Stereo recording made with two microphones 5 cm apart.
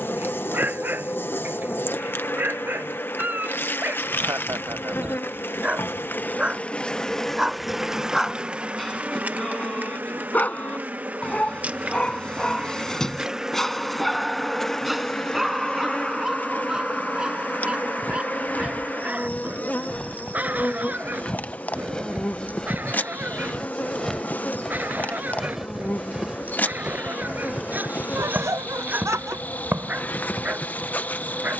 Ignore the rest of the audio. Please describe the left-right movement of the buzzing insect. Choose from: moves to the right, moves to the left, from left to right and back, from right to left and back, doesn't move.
from left to right and back.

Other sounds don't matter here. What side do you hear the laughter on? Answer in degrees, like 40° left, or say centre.
60° right.